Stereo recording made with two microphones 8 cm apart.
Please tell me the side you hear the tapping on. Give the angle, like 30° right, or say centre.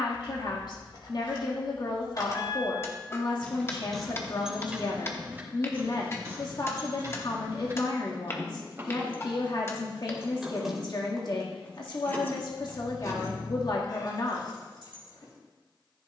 30° left.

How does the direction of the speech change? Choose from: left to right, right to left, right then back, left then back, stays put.
stays put.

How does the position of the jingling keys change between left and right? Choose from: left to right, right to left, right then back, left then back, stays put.
right then back.